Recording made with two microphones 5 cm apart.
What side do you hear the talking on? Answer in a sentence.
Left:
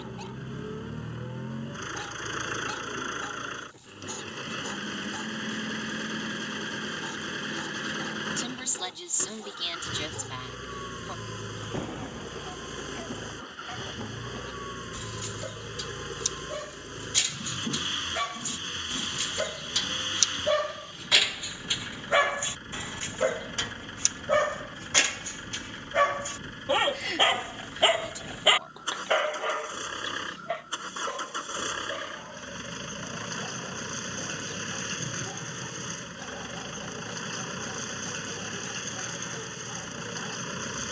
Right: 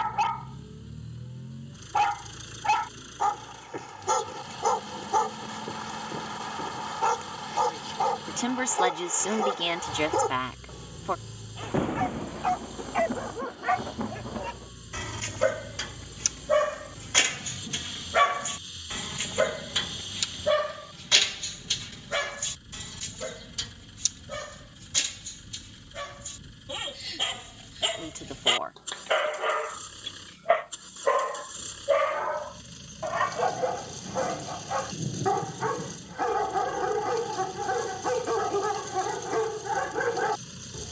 You can hear the talking on the right.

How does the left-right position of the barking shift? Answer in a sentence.
You can hear the barking move from right to left and back again.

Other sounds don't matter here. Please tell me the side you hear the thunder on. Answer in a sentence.
You can hear the thunder on the right.